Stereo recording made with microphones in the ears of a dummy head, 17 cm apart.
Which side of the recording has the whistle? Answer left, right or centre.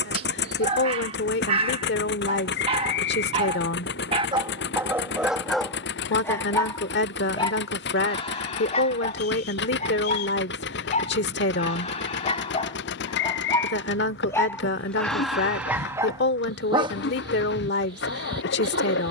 left.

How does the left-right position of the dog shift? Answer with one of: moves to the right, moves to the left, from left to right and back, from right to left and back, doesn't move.
from right to left and back.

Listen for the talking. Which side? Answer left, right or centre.
left.